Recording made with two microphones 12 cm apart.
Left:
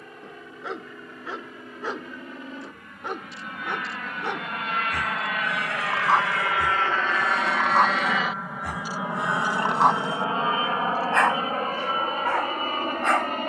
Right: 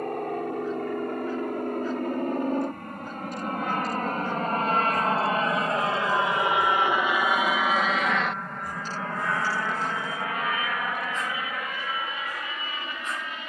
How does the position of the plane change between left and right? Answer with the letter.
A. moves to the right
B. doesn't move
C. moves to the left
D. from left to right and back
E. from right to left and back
C.